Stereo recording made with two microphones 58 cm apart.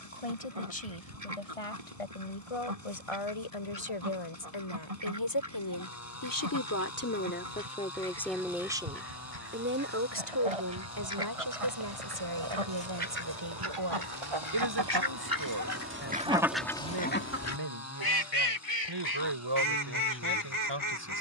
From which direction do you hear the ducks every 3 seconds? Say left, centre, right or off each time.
right, right, right, right, right, centre, left.